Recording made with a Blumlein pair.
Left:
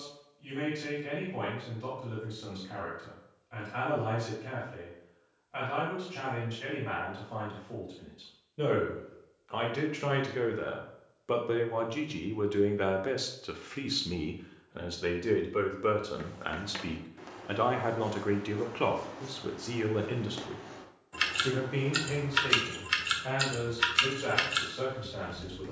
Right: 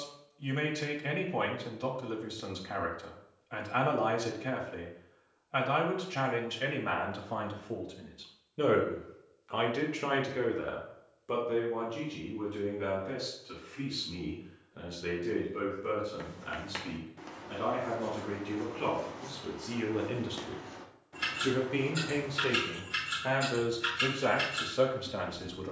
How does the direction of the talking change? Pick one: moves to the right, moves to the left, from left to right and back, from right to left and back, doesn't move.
from right to left and back.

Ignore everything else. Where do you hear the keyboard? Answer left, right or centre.
left.